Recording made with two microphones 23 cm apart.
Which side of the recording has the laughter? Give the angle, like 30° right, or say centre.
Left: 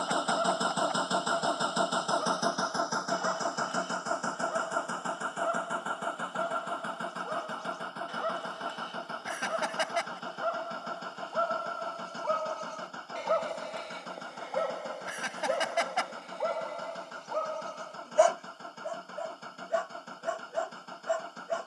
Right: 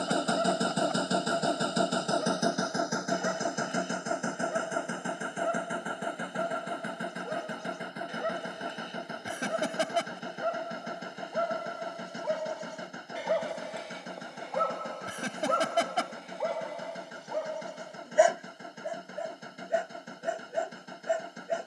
40° right.